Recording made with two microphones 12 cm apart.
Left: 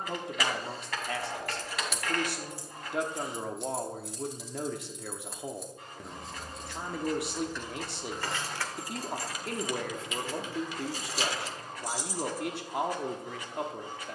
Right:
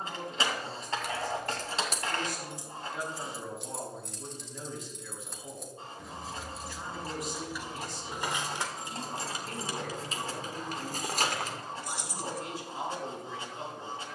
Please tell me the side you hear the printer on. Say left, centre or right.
right.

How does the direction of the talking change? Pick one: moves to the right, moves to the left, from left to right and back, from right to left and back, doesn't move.
doesn't move.